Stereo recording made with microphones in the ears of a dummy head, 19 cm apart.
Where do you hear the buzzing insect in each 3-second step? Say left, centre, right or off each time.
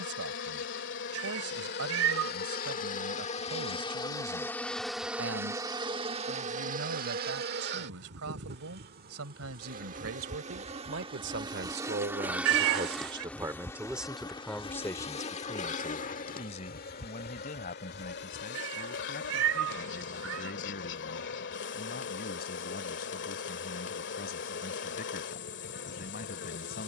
left, centre, right, right, centre, left, left, left, left.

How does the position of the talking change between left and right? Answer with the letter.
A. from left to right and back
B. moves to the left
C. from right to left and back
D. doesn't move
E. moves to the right
B.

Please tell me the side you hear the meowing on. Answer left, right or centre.
right.